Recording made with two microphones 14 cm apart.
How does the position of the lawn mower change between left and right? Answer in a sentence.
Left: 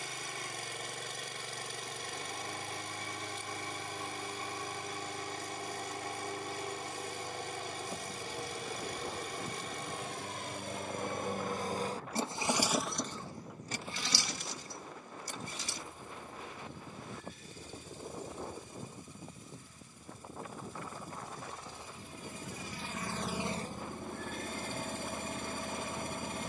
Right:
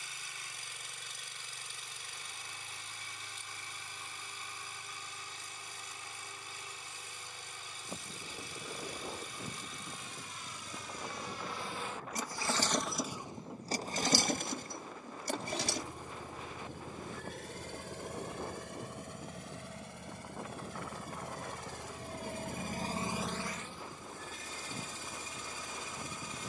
You can hear the lawn mower move from left to right and back again.